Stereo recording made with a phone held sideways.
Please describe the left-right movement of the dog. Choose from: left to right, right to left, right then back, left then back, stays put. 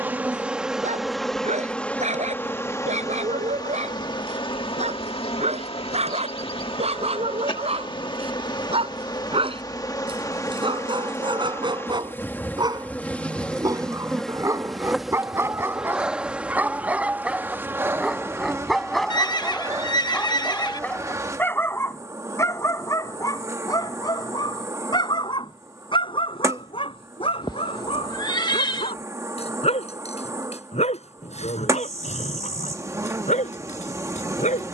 right to left.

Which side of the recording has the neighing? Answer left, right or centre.
left.